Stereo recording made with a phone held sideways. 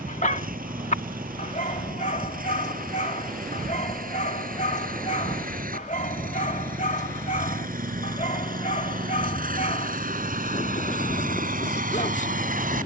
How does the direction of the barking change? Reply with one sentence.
In this clip you hear the barking stay put.